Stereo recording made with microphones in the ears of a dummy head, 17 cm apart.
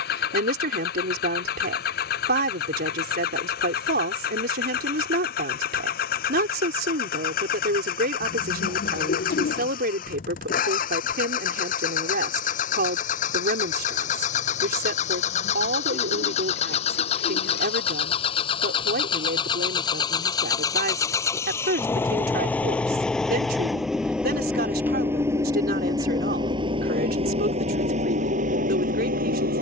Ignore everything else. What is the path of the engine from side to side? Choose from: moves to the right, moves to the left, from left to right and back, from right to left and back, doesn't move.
moves to the right.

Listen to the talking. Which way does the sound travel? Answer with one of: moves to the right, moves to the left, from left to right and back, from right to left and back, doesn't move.
doesn't move.